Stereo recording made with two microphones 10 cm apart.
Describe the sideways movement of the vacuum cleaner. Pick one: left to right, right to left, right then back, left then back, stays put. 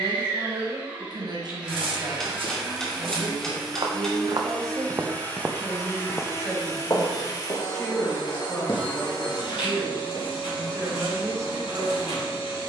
right to left.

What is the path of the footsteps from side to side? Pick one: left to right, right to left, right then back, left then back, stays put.
right to left.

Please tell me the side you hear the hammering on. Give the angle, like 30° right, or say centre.
10° left.